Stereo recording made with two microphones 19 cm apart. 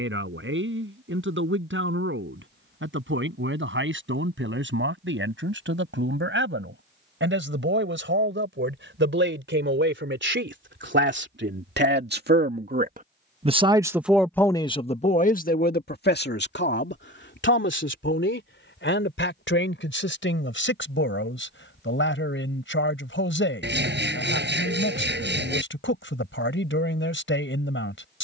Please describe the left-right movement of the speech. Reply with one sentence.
You can hear the speech move from right to left.